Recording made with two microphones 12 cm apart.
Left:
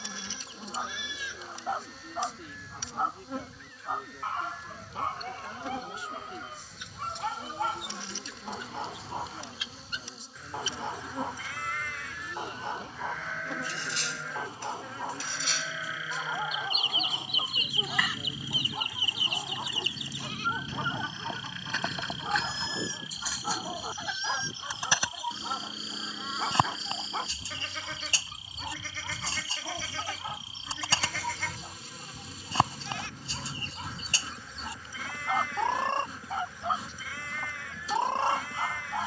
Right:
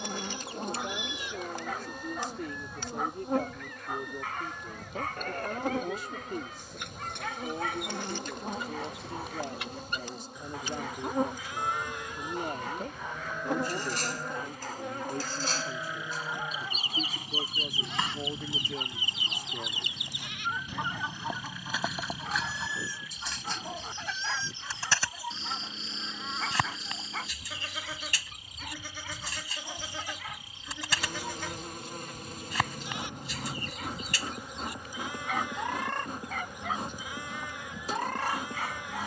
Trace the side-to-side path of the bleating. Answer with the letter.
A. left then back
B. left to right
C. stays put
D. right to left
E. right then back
A.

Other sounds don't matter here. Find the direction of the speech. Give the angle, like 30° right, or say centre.
50° right.